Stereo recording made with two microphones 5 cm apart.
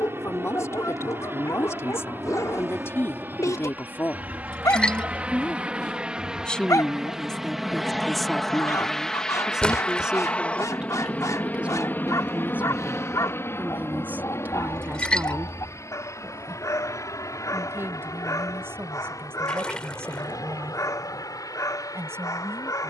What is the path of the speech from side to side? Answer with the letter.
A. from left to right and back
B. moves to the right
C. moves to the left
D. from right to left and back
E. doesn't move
B.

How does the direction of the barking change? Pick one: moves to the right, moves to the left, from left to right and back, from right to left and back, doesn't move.
doesn't move.